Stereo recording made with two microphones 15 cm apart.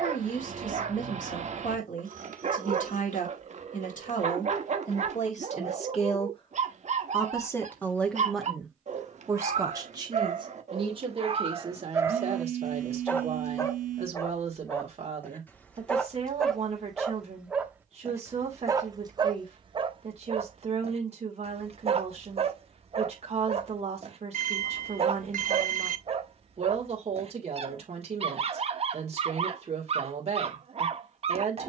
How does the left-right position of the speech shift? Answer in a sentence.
You can hear the speech travel towards the right.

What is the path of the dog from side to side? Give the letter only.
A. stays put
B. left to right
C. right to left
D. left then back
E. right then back
D.